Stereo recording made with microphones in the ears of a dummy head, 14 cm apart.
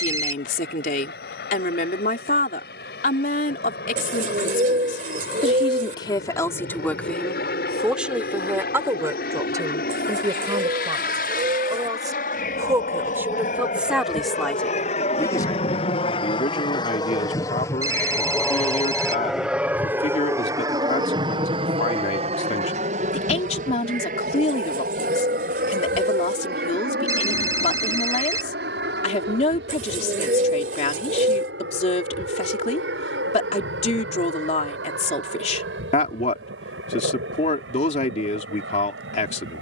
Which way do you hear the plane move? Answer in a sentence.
You can hear the plane go from the left side to the right.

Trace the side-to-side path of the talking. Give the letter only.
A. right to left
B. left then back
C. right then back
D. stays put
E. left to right
C.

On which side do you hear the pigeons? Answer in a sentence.
You can hear the pigeons on the right.